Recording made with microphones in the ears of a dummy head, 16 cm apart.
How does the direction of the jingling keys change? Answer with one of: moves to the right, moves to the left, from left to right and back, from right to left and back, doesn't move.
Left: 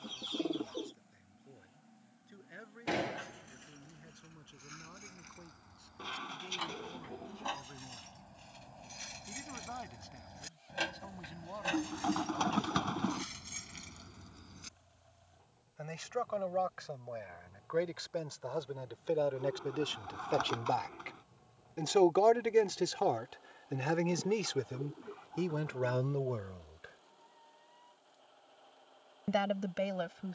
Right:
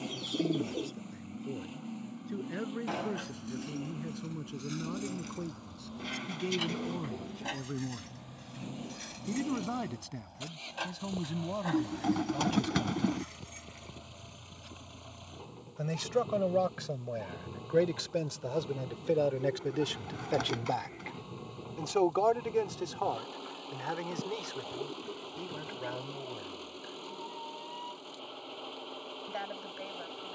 moves to the left.